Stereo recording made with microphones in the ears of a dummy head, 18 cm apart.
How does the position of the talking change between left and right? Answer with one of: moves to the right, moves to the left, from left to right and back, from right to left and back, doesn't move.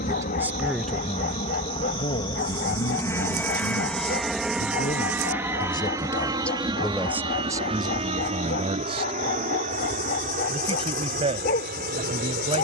from right to left and back.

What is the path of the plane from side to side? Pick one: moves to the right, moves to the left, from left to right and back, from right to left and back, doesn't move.
moves to the right.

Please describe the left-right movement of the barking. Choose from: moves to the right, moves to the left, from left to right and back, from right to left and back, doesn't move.
doesn't move.